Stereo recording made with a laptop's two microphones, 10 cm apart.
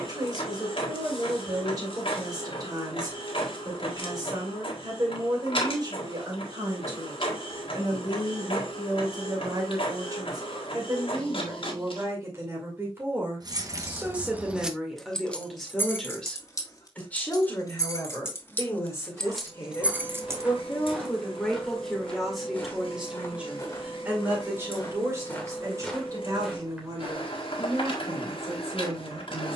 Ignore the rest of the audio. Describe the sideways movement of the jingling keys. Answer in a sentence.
In this clip you hear the jingling keys move from right to left and back again.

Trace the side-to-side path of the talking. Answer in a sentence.
In this clip you hear the talking go left and come back.